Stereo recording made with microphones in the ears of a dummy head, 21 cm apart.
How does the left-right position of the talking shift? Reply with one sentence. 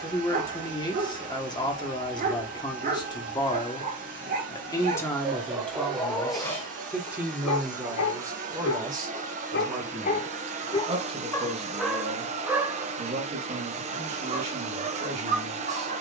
You can hear the talking travel towards the right.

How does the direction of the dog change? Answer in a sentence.
You can hear the dog go left and come back.